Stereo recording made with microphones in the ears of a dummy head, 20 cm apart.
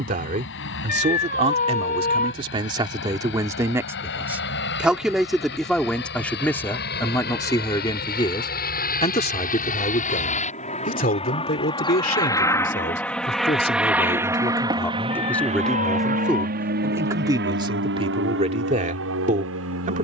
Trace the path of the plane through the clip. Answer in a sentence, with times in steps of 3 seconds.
You can hear the plane on the left from 0 s, in the centre from 12 s and on the right from 15 s.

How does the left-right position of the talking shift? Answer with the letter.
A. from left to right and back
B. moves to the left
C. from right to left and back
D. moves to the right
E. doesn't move
C.